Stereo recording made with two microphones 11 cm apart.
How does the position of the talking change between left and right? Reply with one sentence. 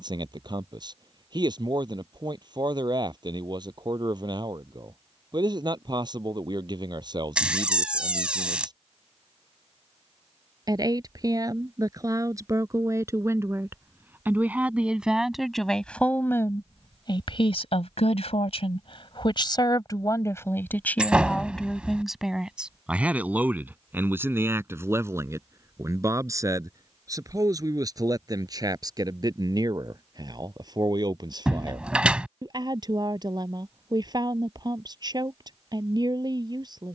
In this clip you hear the talking move from right to left and back again.